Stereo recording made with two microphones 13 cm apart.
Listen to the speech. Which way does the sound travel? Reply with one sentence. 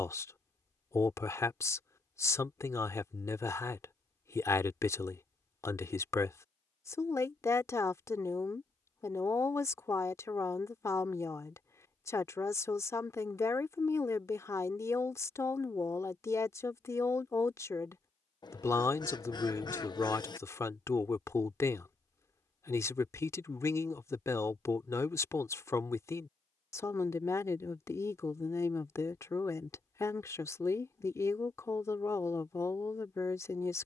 You can hear the speech stay in one place.